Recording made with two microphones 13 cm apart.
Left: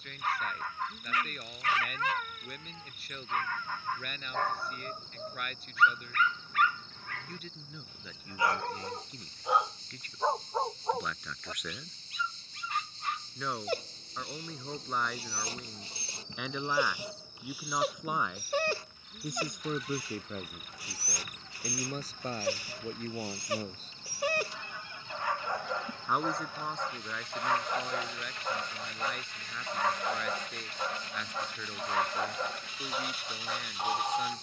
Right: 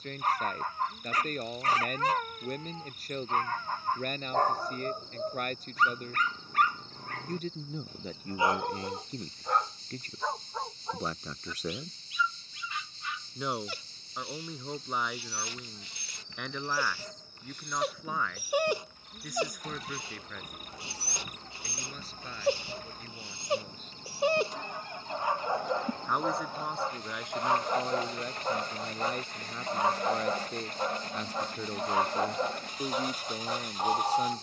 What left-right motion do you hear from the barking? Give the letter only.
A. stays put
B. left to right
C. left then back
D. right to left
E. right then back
C.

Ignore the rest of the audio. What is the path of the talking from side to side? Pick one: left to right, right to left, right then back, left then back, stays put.
left then back.